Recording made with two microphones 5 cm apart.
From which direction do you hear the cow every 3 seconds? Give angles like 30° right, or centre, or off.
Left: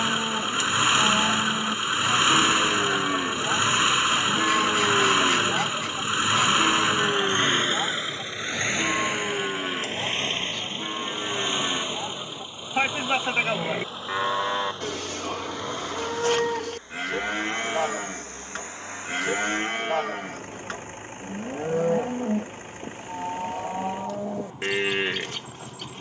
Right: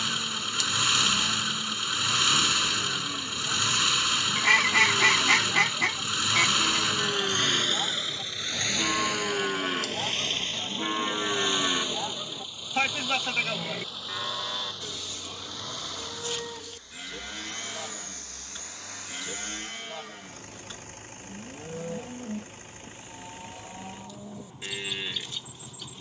70° left, 50° left, 20° left, 10° right, 30° left, 70° left, 70° left, 70° left, 70° left.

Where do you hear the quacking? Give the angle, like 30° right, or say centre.
70° right.